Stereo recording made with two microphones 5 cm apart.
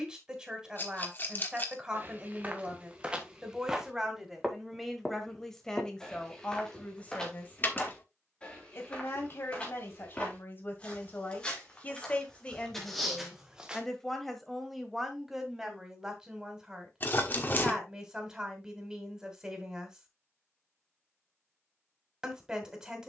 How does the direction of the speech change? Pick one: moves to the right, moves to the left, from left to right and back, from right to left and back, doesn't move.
from right to left and back.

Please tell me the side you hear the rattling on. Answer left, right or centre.
left.